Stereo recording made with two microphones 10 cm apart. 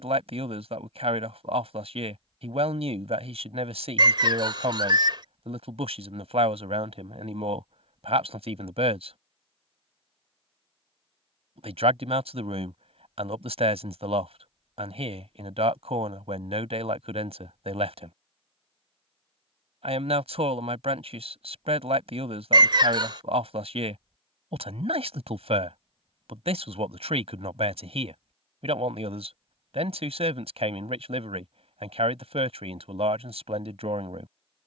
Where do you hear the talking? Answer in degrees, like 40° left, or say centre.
70° right.